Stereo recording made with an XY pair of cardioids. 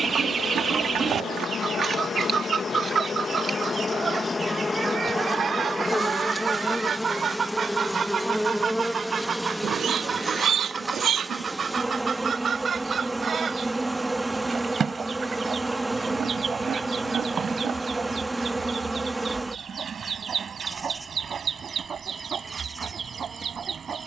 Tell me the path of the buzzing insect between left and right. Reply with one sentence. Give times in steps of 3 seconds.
In this clip you hear the buzzing insect on the left from 0 s and in the centre from 6 s.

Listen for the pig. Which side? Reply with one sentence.
You can hear the pig on the right.